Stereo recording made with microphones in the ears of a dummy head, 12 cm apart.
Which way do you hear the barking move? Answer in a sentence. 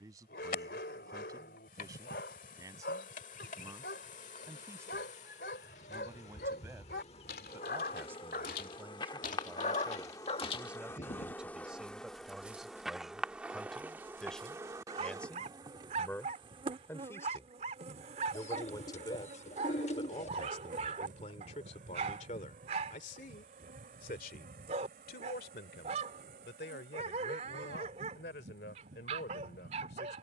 In this clip you hear the barking travel towards the right.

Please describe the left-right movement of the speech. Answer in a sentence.
In this clip you hear the speech move from right to left.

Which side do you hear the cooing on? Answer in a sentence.
In this clip you hear the cooing on the left.